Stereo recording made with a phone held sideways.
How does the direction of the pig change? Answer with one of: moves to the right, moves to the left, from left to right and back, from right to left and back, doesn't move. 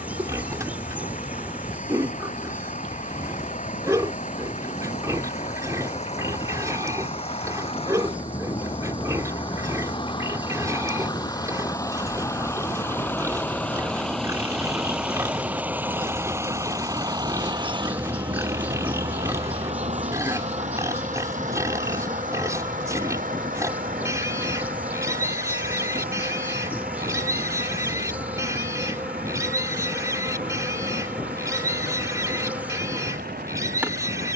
doesn't move.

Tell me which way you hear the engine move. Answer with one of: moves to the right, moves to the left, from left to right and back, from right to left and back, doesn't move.
moves to the right.